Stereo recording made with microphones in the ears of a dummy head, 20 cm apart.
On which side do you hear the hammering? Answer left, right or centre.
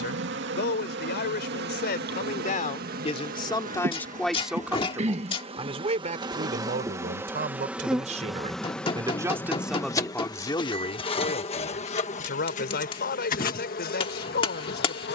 left.